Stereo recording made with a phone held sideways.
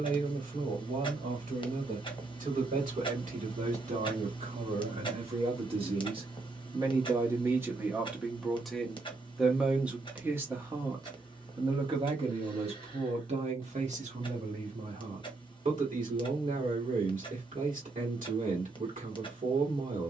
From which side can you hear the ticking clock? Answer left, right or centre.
left.